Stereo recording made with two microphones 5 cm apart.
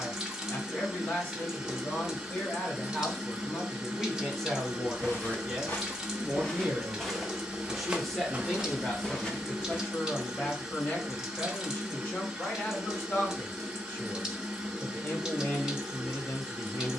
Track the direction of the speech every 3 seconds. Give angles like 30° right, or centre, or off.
30° left, 10° left, centre, 30° left, 30° left, 30° left.